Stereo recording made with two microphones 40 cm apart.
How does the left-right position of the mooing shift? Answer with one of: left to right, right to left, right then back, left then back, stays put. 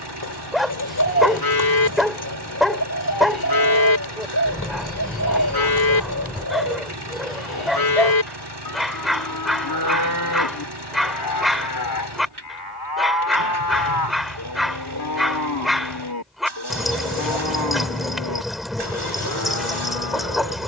stays put.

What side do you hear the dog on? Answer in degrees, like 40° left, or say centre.
centre.